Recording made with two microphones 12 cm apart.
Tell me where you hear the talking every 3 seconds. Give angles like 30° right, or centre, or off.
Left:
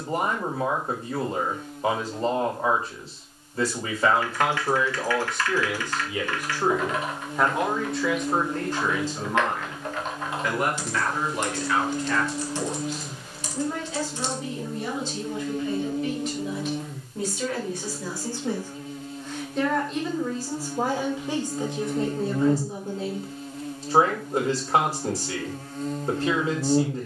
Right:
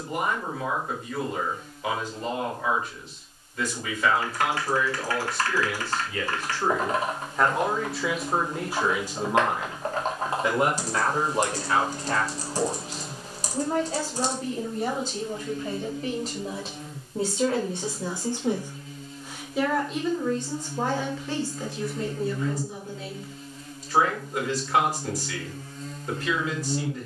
40° left, 30° left, centre, 20° right, 40° right, 40° right, 10° right, 30° left, 30° left.